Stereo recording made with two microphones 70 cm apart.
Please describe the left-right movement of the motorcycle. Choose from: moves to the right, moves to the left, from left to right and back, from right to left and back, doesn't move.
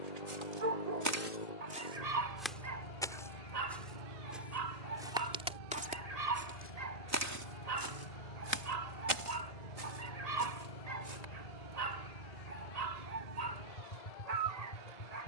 doesn't move.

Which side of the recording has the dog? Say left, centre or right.
right.